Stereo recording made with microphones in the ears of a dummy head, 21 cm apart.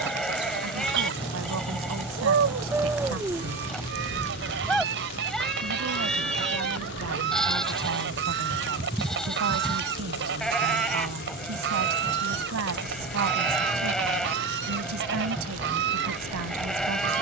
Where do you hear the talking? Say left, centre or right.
right.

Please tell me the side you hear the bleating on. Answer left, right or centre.
centre.